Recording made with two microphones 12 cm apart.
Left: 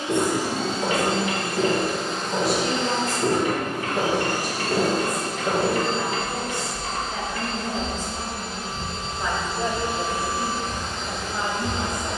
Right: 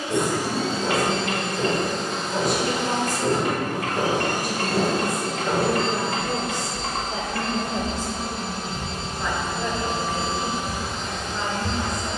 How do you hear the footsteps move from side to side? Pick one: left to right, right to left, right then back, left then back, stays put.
left to right.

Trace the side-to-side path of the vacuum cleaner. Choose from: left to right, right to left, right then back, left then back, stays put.
right then back.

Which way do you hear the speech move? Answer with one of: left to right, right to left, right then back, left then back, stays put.
right then back.